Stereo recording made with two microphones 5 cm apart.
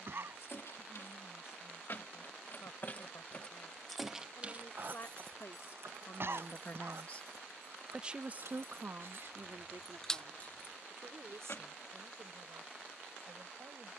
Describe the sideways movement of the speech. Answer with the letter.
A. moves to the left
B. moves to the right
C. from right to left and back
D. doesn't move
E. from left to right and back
B.